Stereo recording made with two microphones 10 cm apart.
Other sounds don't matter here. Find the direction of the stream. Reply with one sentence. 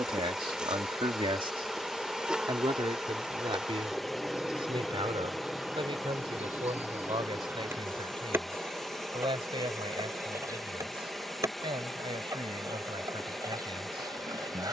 In this clip you hear the stream in the centre.